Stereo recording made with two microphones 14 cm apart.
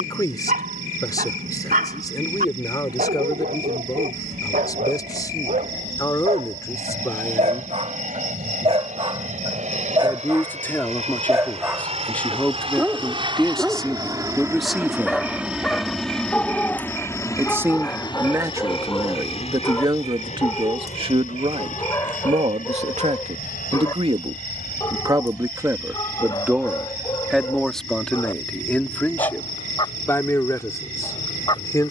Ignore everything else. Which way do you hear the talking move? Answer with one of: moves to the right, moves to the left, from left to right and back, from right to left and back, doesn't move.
from left to right and back.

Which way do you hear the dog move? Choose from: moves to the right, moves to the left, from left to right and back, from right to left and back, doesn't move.
moves to the left.